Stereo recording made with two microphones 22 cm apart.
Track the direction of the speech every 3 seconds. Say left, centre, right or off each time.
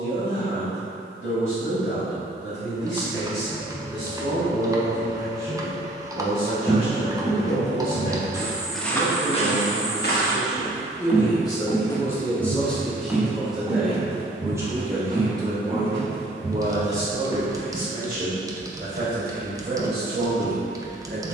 left, left, left, left, centre, right, right.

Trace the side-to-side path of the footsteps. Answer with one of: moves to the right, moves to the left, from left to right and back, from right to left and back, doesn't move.
from right to left and back.